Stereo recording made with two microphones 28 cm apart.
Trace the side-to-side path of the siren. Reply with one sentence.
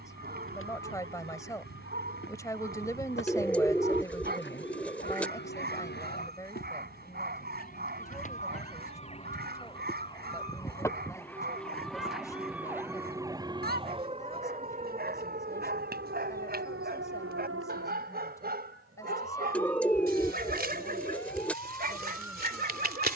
In this clip you hear the siren move from left to right.